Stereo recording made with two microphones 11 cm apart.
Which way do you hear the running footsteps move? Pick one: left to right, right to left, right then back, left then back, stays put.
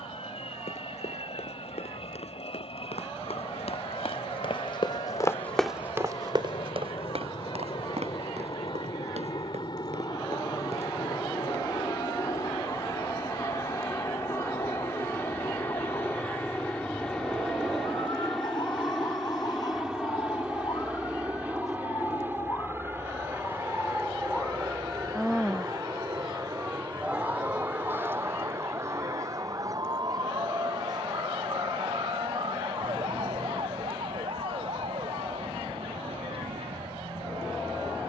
left to right.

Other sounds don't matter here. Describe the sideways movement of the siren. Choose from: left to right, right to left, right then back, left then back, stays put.
left to right.